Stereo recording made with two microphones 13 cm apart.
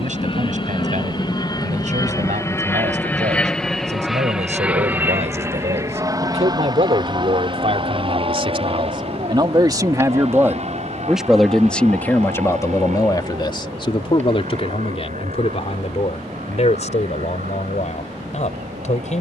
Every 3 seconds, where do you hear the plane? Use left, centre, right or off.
left, centre, right, right, right, right, right.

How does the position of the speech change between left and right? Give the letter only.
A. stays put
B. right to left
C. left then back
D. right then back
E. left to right
B.